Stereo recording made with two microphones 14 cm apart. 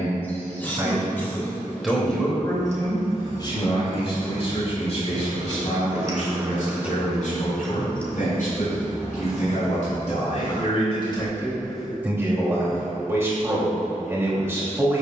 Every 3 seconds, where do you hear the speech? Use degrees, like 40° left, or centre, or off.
10° right, 50° left, 70° left, 50° left, 20° right.